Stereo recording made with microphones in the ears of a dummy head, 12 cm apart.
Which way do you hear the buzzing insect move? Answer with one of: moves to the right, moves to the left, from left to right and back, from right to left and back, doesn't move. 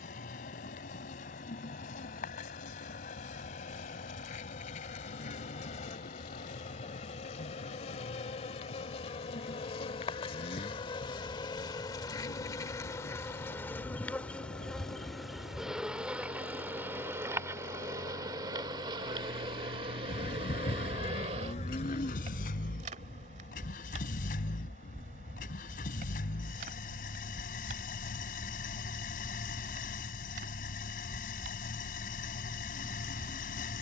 moves to the right.